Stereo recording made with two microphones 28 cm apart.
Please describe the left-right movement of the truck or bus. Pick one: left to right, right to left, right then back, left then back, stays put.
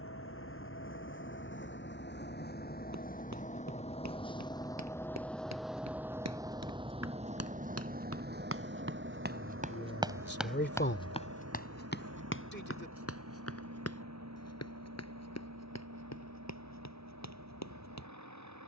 left to right.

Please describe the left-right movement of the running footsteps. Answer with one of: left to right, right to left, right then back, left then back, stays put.
right to left.